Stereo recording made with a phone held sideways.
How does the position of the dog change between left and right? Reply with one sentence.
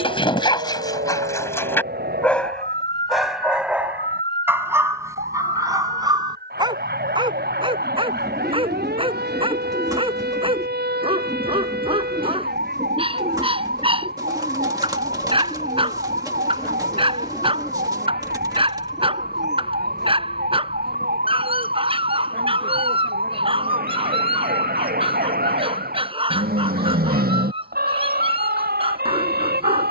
In this clip you hear the dog move from left to right.